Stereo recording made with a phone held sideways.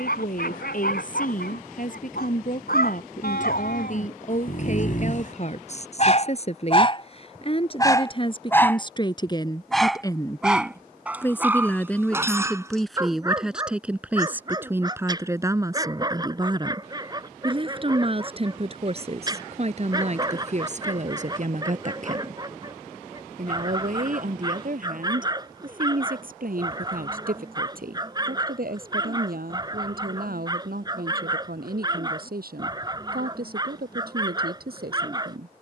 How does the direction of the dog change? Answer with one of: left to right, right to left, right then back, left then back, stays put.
left to right.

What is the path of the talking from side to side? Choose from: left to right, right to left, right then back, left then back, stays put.
left to right.